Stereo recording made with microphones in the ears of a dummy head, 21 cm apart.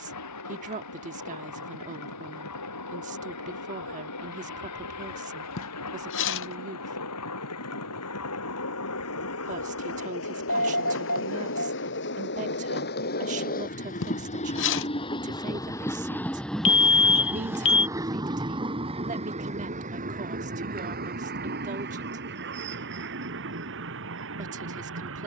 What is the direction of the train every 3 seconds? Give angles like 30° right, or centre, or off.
80° left, 80° left, 70° left, 60° left, 40° left, centre, 30° right, 50° right, 50° right.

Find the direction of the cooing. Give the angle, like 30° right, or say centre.
50° left.